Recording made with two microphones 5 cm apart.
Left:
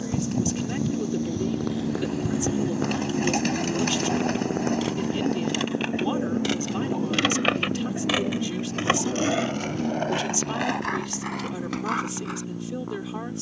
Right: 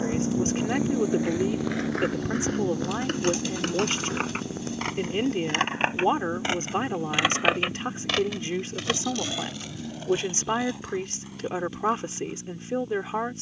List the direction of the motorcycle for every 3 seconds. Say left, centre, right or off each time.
centre, left, left, left, left.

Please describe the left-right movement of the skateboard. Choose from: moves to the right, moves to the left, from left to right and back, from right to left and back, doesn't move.
moves to the left.